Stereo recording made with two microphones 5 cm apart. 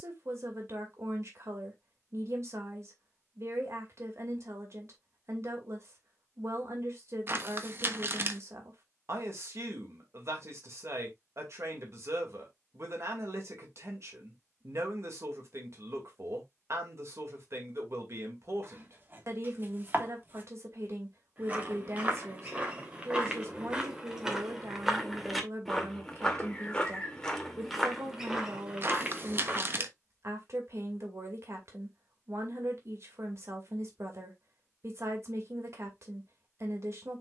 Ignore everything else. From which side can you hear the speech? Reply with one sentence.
You can hear the speech on the right.